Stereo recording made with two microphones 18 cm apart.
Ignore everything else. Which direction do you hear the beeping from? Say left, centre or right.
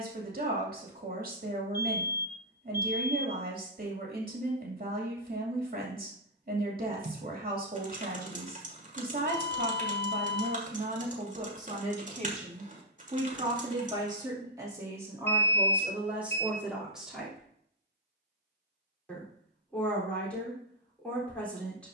left.